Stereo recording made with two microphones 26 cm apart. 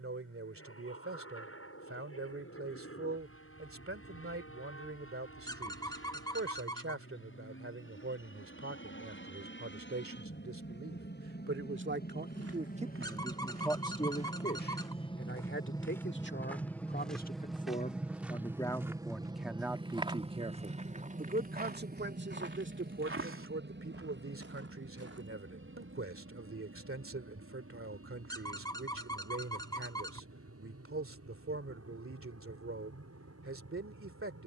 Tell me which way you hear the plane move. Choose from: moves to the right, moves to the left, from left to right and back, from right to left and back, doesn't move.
moves to the right.